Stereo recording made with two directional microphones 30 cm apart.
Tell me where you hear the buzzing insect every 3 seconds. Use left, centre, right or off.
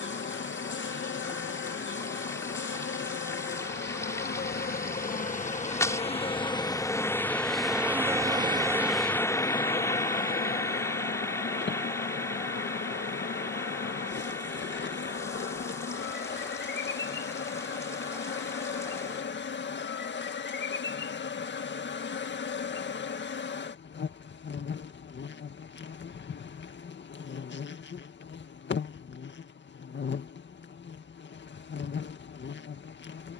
left, left, centre, left, left, left, left, left, left, left, left.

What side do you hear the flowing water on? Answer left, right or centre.
centre.